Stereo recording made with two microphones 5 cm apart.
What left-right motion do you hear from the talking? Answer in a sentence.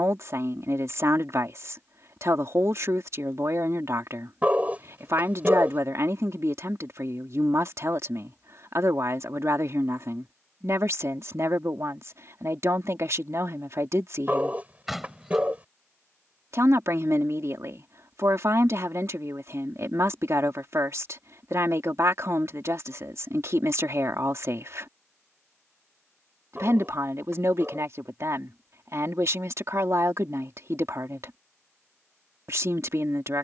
You can hear the talking stay put.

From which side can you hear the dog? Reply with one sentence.
In this clip you hear the dog on the right.